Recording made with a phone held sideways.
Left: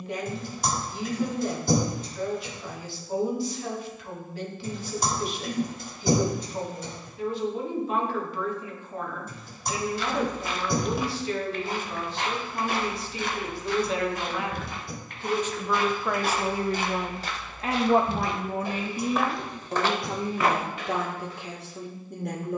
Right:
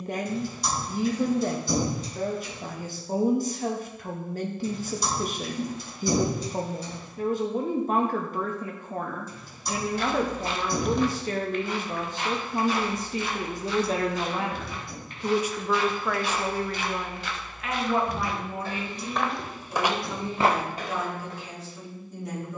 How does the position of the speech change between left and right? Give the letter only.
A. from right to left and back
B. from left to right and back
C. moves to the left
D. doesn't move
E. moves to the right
C.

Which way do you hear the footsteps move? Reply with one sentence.
You can hear the footsteps move from right to left and back again.